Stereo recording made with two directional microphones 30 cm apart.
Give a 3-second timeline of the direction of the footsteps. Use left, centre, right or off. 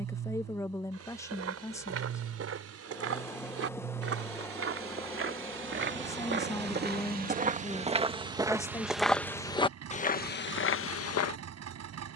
right, right, right, left.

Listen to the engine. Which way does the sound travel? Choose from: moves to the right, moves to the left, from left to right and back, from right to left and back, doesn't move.
doesn't move.